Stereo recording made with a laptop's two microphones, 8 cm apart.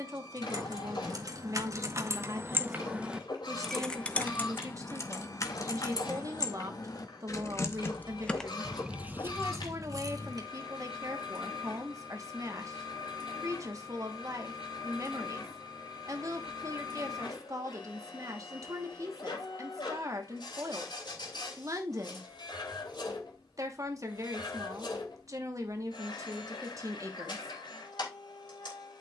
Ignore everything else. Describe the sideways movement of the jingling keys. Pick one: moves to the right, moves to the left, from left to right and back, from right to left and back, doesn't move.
from right to left and back.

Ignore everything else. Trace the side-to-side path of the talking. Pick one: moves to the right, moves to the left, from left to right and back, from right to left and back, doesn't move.
doesn't move.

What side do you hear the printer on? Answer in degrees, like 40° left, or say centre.
80° left.